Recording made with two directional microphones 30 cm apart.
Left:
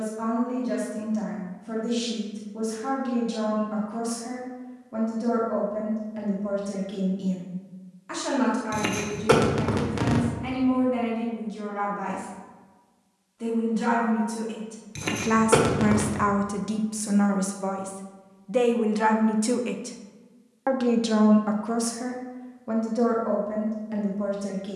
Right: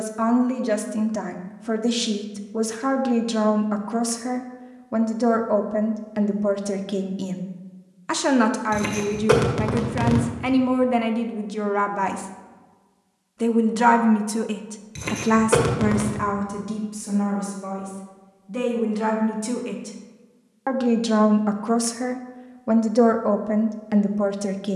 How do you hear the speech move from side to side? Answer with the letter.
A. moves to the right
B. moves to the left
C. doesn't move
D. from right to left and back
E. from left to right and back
D.